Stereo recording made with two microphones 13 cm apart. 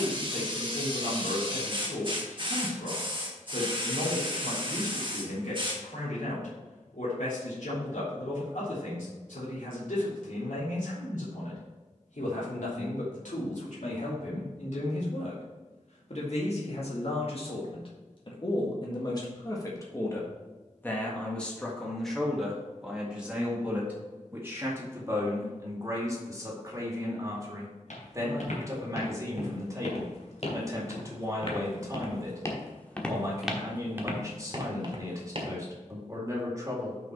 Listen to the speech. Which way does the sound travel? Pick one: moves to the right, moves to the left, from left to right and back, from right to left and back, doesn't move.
moves to the right.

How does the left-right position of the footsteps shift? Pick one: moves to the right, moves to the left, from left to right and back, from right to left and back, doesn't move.
moves to the right.